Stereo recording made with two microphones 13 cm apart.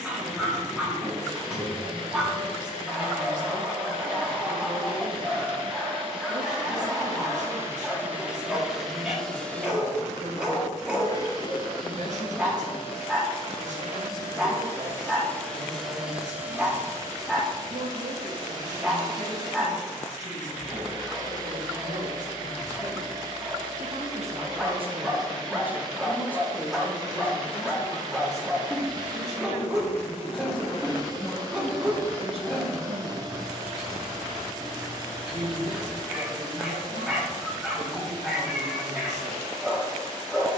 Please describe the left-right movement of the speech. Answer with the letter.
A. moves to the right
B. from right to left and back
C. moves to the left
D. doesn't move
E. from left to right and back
B.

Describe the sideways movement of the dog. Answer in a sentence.
In this clip you hear the dog stay in one place.